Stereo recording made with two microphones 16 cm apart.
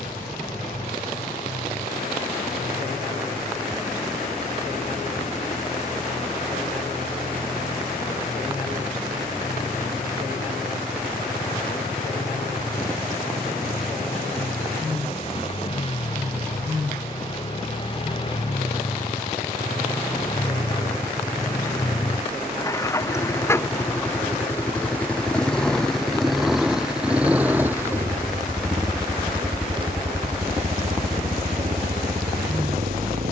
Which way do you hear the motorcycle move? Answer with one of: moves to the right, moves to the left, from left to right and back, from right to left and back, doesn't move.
moves to the right.